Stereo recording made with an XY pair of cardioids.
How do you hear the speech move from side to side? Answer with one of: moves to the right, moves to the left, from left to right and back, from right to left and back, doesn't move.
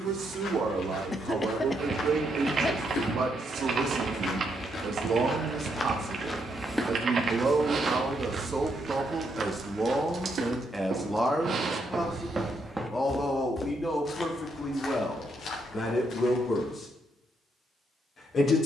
moves to the left.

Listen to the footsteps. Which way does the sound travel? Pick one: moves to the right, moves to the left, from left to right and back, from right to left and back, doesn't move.
from left to right and back.